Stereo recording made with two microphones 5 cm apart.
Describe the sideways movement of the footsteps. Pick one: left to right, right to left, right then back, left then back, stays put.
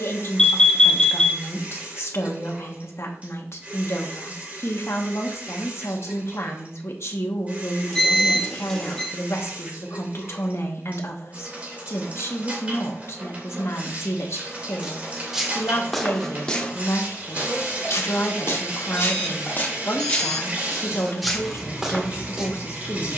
left then back.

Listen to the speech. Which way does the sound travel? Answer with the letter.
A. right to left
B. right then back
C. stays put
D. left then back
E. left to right
C.